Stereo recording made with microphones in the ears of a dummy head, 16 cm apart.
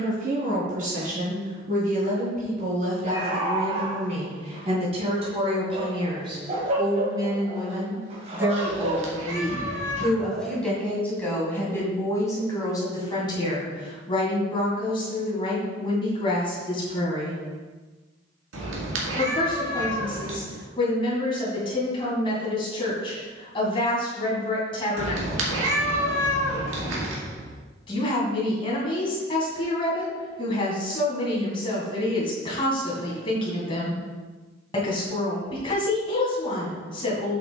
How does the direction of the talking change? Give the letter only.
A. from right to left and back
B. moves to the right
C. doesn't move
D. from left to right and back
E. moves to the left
E.